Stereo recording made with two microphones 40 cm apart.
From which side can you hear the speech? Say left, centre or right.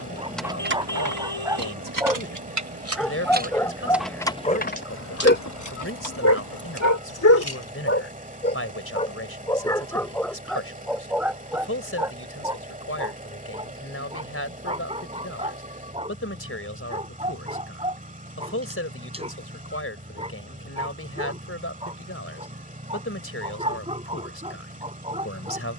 left.